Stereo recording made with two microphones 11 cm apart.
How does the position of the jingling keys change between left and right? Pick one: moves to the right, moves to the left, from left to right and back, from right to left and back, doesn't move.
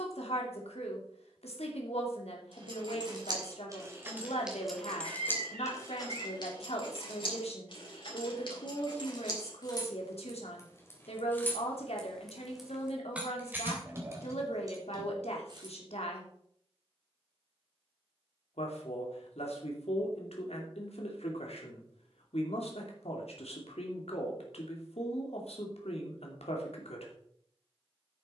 from right to left and back.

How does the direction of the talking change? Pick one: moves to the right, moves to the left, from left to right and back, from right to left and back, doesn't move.
doesn't move.